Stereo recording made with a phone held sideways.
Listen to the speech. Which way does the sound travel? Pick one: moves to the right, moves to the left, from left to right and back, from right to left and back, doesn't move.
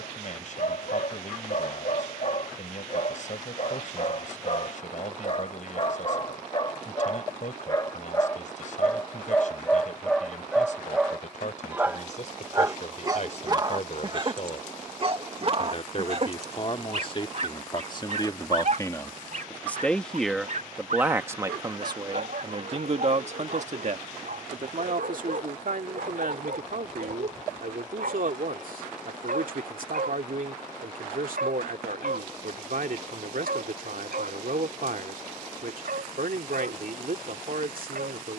moves to the right.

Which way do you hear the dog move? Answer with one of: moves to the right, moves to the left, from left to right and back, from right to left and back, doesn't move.
moves to the right.